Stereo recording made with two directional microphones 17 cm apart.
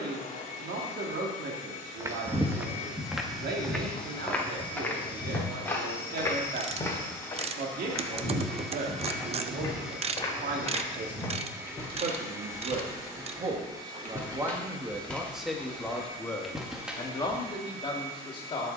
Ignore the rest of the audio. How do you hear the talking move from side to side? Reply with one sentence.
You can hear the talking move from right to left.